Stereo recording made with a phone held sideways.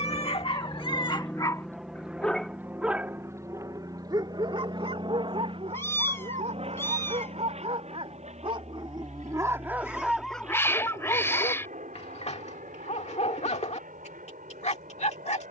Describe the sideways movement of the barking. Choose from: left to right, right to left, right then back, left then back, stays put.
right then back.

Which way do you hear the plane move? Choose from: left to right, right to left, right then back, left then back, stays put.
left to right.